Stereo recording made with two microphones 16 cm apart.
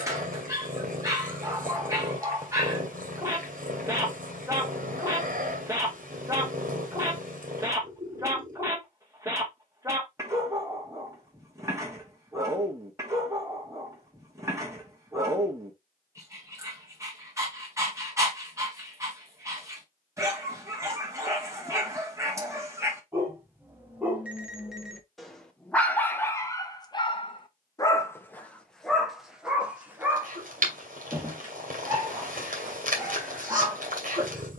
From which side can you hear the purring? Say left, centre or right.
right.